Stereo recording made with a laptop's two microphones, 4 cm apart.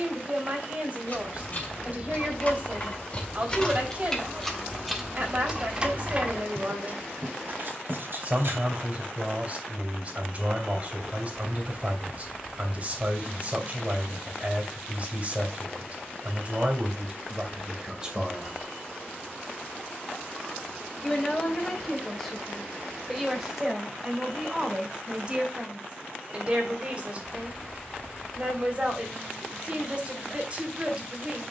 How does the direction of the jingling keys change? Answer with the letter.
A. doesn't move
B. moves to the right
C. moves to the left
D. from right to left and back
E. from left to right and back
B.